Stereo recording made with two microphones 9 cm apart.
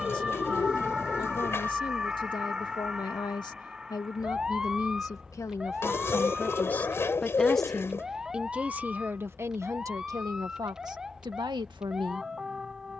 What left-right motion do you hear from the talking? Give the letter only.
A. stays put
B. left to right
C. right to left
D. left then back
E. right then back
B.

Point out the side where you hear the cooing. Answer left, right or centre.
left.